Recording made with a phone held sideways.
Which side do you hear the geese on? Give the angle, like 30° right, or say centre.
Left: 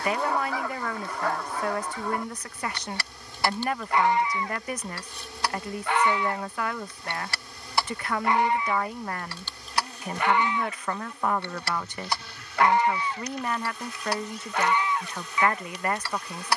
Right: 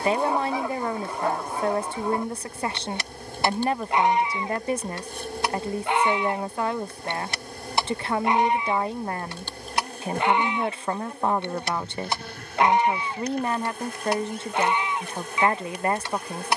20° right.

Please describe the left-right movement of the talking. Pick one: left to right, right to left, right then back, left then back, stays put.
stays put.